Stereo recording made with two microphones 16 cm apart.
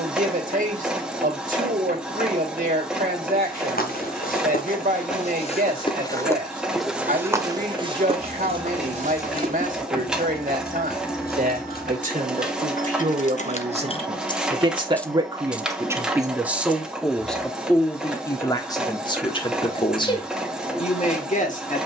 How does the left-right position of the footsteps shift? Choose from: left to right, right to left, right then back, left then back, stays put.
left to right.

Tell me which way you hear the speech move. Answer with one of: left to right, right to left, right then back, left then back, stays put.
right to left.